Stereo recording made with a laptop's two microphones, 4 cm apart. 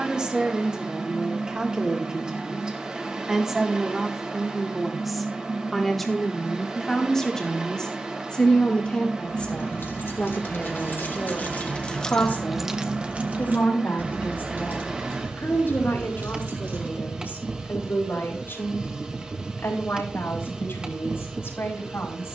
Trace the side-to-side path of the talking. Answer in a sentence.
In this clip you hear the talking move from right to left.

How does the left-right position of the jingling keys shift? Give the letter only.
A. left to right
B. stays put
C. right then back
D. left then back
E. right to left
A.